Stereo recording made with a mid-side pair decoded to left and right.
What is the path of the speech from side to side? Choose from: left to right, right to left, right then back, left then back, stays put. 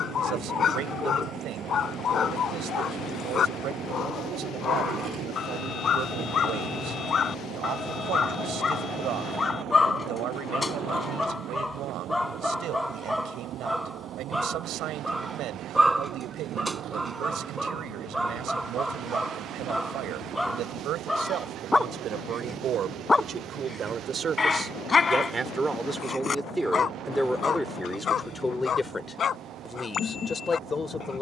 right to left.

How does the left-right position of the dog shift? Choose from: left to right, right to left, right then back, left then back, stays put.
right then back.